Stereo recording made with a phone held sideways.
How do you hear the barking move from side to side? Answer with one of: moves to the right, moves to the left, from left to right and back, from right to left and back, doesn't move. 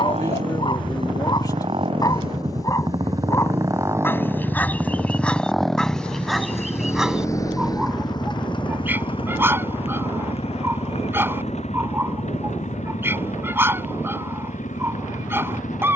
moves to the right.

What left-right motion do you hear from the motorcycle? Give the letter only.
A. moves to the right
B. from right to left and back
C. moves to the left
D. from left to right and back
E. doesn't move
C.